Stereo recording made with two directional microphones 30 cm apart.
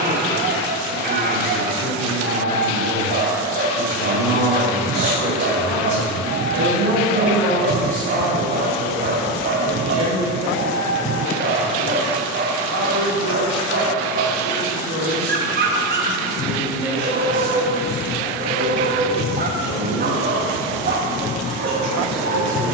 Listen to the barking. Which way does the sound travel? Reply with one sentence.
In this clip you hear the barking stay put.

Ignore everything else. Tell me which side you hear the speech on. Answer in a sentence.
You can hear the speech on the right.